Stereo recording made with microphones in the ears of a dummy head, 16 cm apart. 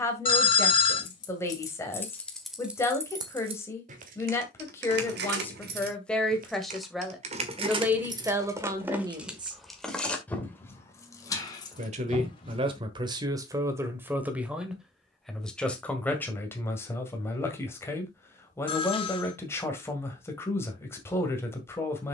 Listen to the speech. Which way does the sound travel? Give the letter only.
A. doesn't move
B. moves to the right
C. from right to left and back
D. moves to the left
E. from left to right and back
E.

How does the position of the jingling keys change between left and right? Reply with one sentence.
You can hear the jingling keys move from left to right and back again.